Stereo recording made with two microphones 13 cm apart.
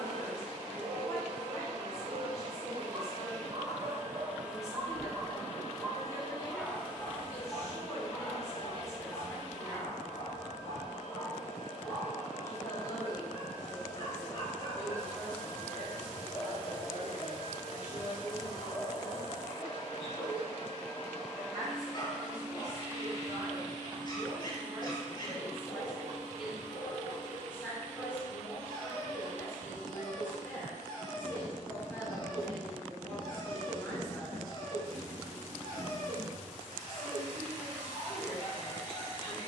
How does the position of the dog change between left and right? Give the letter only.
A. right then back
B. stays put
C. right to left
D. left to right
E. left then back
C.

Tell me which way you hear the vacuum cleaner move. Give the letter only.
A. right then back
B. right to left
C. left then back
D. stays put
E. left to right
C.